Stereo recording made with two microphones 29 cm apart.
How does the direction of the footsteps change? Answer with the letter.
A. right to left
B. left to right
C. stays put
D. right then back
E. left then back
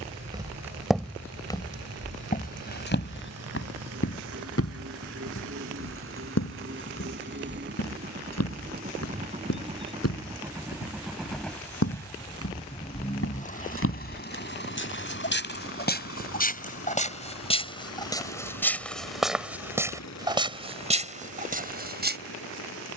E.